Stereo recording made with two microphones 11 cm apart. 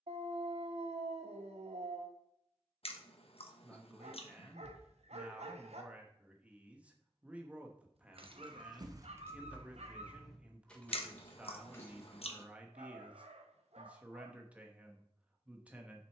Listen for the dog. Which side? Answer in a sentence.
In this clip you hear the dog on the right.